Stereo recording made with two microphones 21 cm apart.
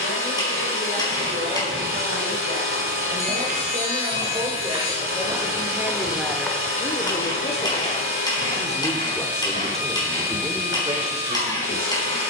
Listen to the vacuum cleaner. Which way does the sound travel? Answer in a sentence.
In this clip you hear the vacuum cleaner stay in one place.